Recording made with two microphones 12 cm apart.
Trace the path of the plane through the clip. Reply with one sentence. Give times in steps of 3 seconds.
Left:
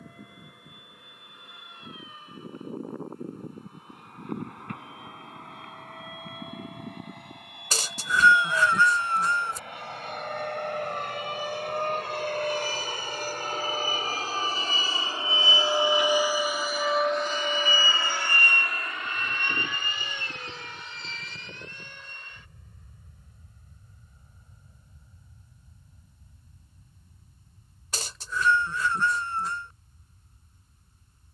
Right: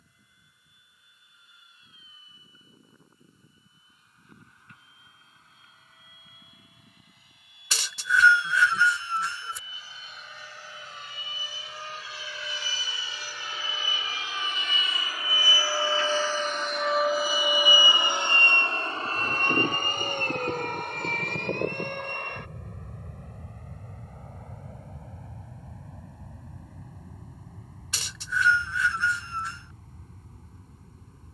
In this clip you hear the plane on the left from 0 s, in the centre from 15 s and on the right from 18 s.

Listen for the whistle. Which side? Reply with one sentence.
In this clip you hear the whistle on the left.